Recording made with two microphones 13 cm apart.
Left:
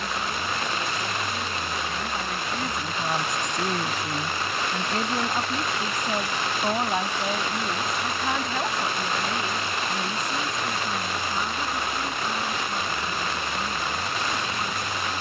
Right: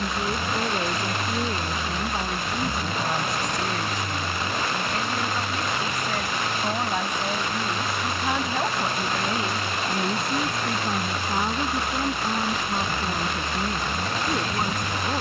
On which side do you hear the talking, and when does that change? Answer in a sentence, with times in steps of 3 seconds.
In this clip you hear the talking on the right from 0 s, on the left from 3 s, in the centre from 6 s and on the right from 9 s.